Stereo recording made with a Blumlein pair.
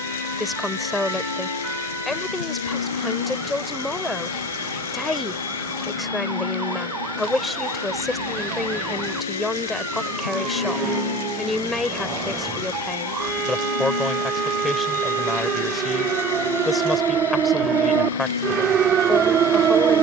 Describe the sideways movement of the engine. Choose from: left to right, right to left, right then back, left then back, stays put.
stays put.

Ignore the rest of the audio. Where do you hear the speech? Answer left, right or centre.
centre.